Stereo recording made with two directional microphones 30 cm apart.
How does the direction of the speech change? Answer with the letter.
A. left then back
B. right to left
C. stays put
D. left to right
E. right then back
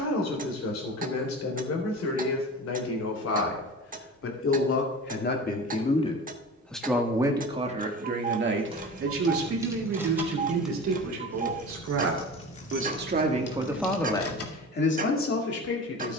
E.